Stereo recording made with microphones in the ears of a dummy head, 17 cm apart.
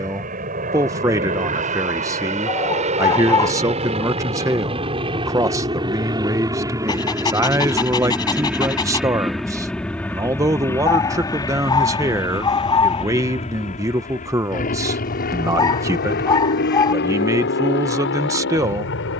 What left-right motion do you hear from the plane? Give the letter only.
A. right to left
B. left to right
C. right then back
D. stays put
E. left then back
A.